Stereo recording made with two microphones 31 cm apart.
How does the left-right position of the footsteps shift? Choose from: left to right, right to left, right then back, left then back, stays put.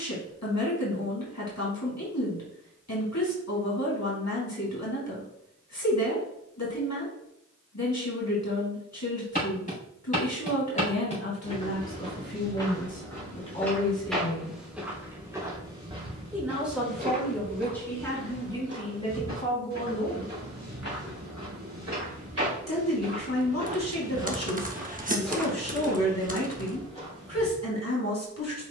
right then back.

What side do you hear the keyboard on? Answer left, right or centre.
right.